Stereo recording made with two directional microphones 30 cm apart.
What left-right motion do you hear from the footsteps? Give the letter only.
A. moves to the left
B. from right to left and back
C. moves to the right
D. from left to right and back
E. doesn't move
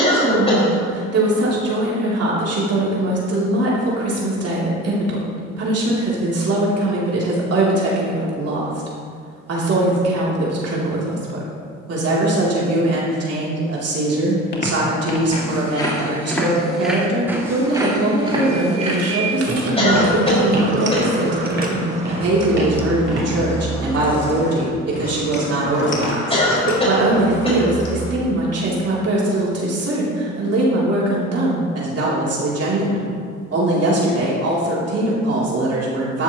C.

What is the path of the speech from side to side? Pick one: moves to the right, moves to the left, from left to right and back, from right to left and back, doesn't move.
doesn't move.